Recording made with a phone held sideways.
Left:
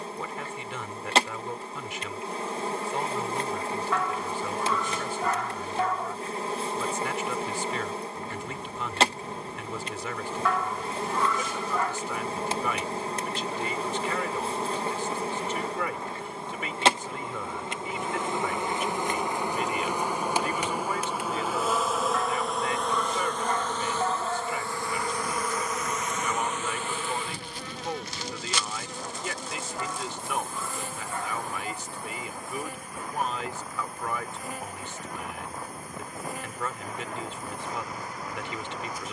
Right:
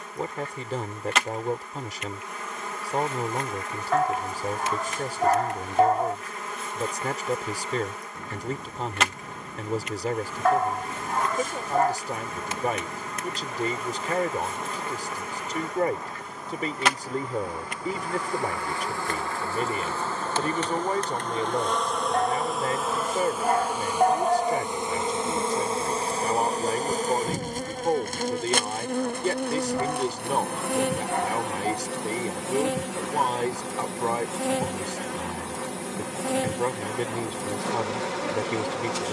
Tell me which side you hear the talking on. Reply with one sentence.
You can hear the talking on the right.